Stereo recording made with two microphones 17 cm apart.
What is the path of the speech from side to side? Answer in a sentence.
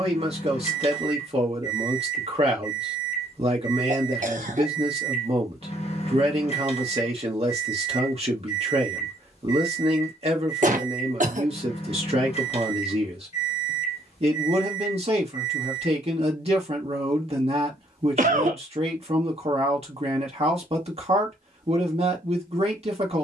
In this clip you hear the speech stay put.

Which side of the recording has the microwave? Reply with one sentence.
In this clip you hear the microwave on the left.